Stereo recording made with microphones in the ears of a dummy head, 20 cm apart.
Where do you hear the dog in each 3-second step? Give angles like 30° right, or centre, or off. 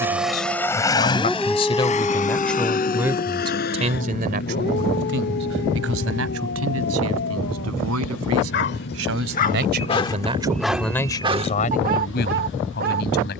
centre, 40° left, 60° left, centre, 50° right.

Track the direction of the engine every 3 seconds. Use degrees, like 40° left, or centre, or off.
20° left, 50° left, 50° left, 60° left, 60° left.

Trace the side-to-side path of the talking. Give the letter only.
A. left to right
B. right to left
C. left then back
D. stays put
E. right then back
E.